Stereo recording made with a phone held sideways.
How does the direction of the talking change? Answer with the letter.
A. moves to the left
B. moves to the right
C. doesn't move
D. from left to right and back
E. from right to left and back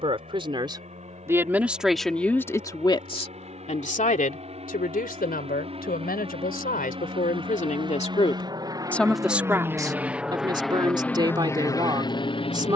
E.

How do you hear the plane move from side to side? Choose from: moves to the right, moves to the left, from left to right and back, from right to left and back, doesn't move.
moves to the left.